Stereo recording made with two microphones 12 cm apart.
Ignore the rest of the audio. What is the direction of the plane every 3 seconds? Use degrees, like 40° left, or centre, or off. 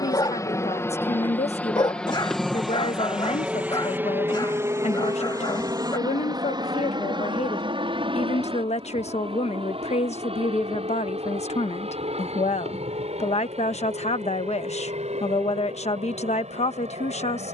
10° left, 20° right, 40° right, 50° right, 50° right, 60° right.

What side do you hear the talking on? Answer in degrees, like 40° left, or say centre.
60° left.